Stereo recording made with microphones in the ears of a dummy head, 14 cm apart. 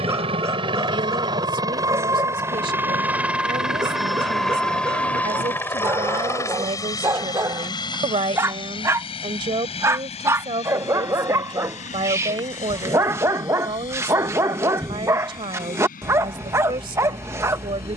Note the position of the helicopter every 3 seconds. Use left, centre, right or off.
right, centre, left, left, left, left.